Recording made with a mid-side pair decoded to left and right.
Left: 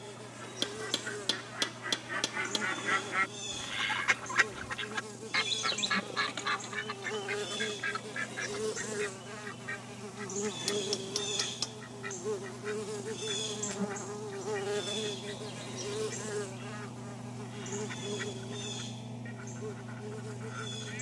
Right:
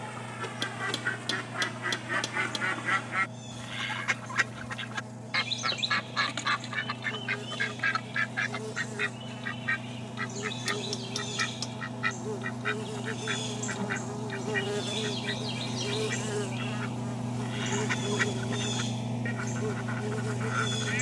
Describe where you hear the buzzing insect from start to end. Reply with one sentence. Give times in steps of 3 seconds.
You can hear the buzzing insect on the left from 0 s, in the centre from 12 s and on the right from 15 s.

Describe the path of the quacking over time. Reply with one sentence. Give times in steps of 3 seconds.
In this clip you hear the quacking on the right from 0 s, in the centre from 3 s and on the right from 6 s.